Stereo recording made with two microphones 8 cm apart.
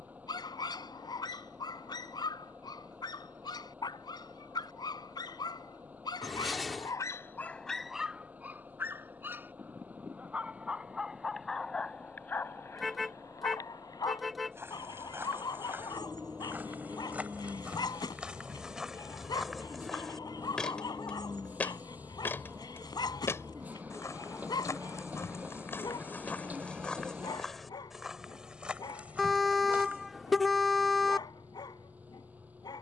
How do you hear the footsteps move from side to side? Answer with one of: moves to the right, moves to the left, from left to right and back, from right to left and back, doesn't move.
from right to left and back.